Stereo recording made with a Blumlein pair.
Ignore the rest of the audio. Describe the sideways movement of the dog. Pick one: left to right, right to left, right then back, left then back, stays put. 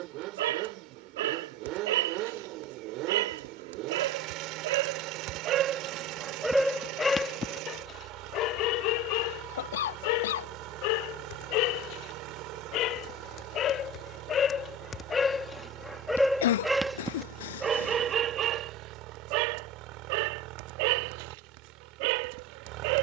left then back.